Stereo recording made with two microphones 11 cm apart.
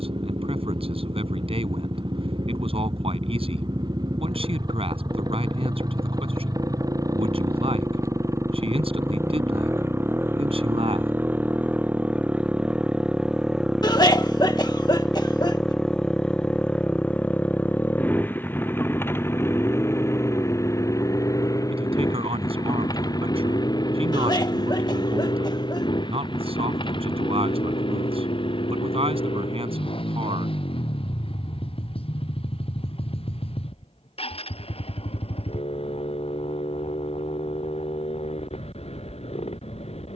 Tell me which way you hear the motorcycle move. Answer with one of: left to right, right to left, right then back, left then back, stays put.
right to left.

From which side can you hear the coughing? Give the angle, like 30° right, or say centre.
40° left.